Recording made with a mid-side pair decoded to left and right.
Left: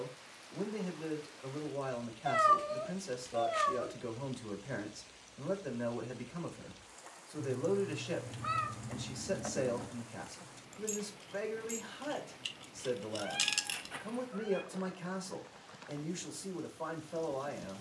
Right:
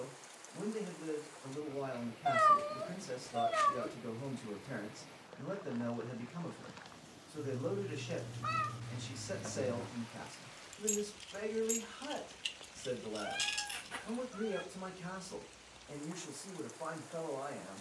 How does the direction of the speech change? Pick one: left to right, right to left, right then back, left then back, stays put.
stays put.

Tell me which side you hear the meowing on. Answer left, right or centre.
centre.